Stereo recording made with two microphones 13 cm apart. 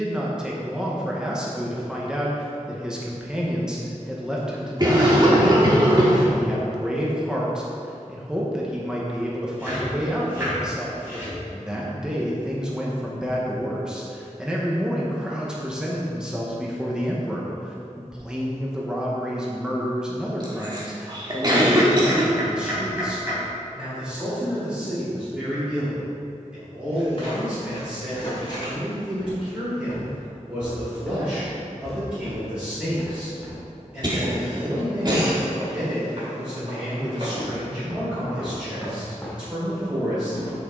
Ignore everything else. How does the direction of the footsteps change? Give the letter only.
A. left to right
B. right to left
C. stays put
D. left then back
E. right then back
E.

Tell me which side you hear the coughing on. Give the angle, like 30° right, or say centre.
30° right.